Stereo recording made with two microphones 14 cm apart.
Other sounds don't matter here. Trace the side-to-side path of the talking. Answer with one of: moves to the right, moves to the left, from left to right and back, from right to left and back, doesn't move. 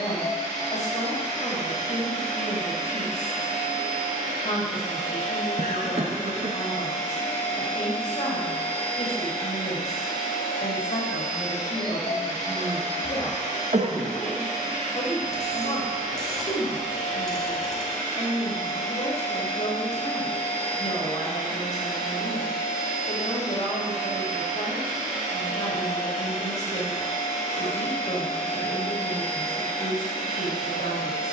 doesn't move.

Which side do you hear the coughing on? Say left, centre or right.
right.